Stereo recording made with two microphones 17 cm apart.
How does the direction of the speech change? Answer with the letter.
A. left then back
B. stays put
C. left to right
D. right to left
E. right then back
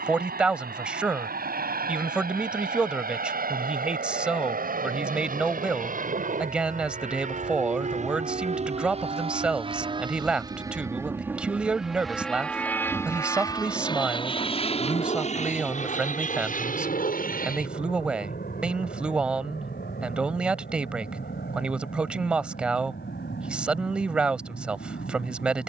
B.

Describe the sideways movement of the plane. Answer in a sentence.
In this clip you hear the plane move from right to left.